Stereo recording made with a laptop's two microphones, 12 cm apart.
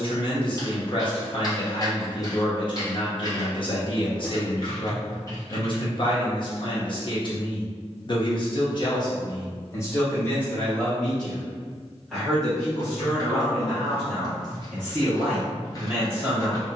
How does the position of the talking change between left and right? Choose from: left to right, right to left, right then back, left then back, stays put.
left to right.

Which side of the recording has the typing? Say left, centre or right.
left.